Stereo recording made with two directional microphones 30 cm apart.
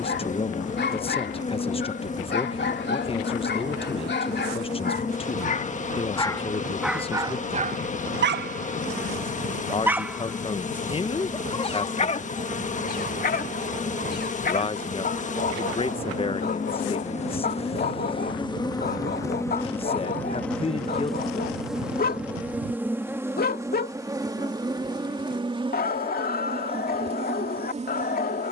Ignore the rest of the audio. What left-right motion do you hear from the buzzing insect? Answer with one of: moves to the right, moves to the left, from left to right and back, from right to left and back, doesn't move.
moves to the right.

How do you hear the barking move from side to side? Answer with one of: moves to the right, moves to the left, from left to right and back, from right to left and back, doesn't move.
from left to right and back.